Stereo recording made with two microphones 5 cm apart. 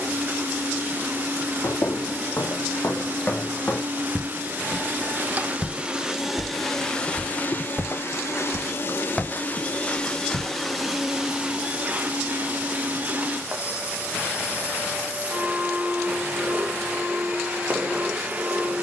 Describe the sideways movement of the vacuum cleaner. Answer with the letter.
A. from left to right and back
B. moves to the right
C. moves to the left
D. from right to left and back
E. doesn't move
D.